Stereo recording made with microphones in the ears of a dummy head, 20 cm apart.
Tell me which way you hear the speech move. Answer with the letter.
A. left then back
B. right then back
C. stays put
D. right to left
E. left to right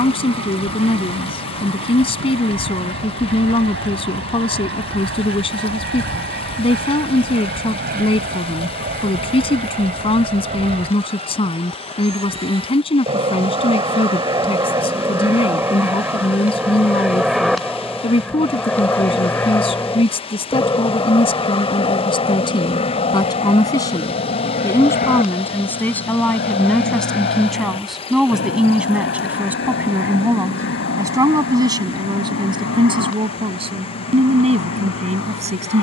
E.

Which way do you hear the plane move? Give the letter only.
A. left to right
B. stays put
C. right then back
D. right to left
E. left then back
D.